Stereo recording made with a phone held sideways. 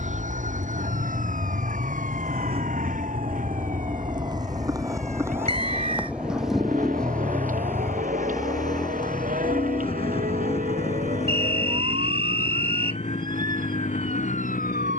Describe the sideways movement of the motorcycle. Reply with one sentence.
In this clip you hear the motorcycle move to the left.